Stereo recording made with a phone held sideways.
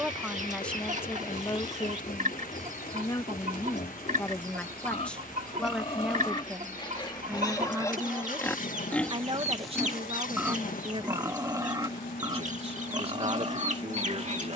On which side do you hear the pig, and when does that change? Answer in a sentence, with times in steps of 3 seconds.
You can hear the pig on the left from 0 s, in the centre from 9 s and on the right from 12 s.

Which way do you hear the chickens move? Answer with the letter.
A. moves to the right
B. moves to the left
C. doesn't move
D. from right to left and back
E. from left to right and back
C.